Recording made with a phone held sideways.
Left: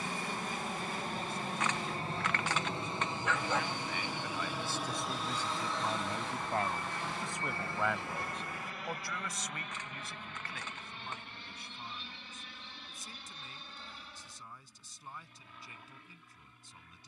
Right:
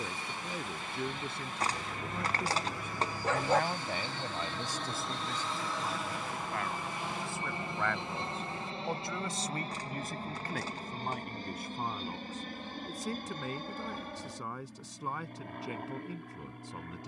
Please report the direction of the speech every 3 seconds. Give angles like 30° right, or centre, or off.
70° right, 20° right, 20° left, 50° right, 70° right, 70° right.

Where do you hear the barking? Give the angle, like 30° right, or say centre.
40° right.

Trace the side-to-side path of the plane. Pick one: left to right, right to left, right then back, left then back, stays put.
left to right.